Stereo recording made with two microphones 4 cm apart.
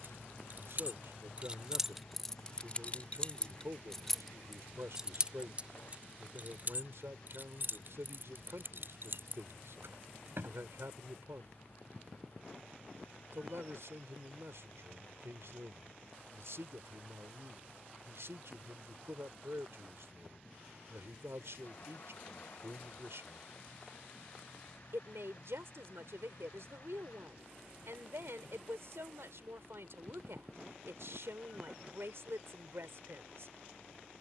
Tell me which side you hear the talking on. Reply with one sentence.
In this clip you hear the talking on the right.